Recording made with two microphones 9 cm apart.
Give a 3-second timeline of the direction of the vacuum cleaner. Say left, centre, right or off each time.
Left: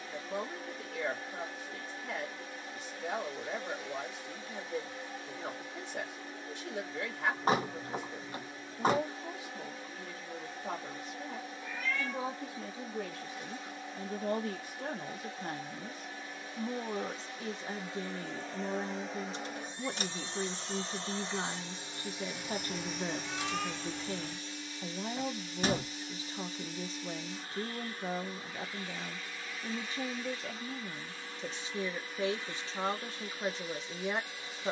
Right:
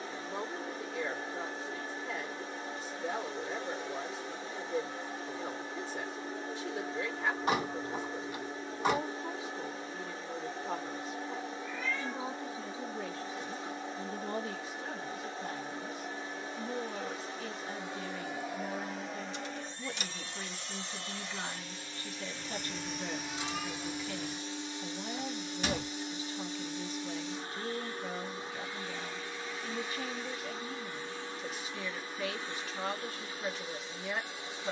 right, right, right, right, right, right, centre, centre, right, right, right, right.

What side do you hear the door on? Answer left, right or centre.
left.